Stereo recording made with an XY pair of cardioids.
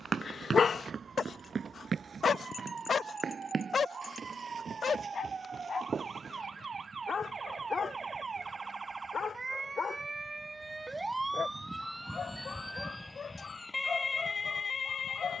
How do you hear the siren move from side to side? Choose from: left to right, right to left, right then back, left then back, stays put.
right to left.